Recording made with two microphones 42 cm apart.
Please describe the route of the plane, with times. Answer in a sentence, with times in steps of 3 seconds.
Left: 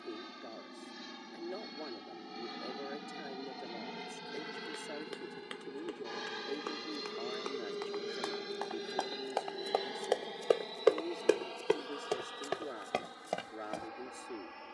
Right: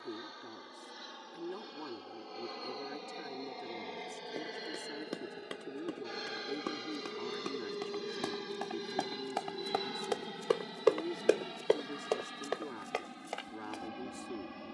In this clip you hear the plane on the left from 0 s, in the centre from 6 s and on the right from 9 s.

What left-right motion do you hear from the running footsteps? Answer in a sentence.
You can hear the running footsteps move to the left.